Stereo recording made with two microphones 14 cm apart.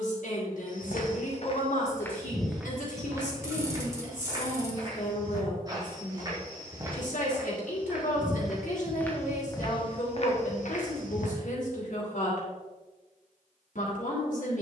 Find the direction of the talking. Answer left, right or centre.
left.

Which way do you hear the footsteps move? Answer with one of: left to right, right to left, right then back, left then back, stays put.
right then back.